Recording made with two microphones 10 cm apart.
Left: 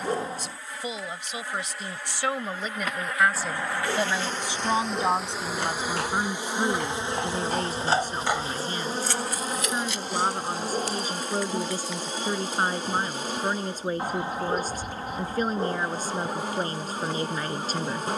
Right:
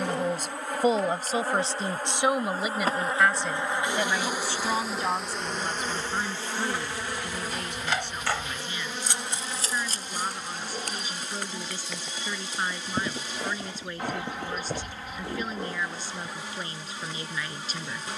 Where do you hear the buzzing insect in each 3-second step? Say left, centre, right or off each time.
right, centre, left, left, left, left.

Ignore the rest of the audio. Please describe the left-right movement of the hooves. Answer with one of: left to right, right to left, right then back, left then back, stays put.
left to right.